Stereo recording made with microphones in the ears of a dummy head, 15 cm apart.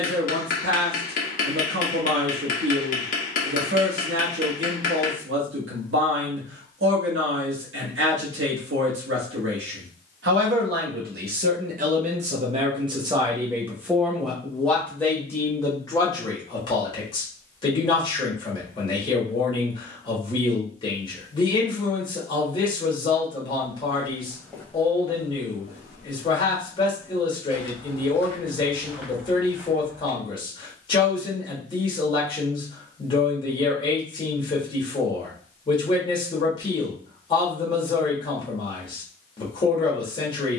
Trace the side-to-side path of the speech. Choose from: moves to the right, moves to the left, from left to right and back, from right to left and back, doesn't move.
moves to the left.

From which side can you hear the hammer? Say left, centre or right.
left.